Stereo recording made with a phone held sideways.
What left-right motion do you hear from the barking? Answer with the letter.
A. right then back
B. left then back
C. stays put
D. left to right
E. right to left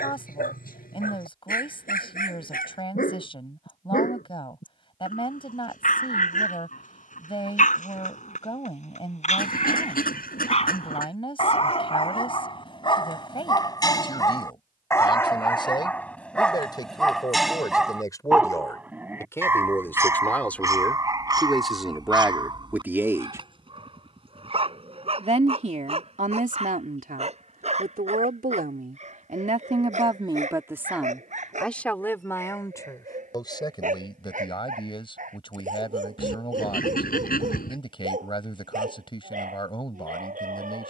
D.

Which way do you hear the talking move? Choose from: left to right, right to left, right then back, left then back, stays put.
right then back.